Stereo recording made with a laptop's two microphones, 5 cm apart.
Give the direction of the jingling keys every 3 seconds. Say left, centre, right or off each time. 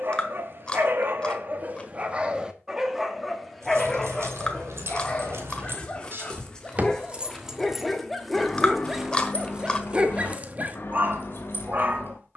off, right, centre, left.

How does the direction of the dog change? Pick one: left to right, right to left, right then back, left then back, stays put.
left then back.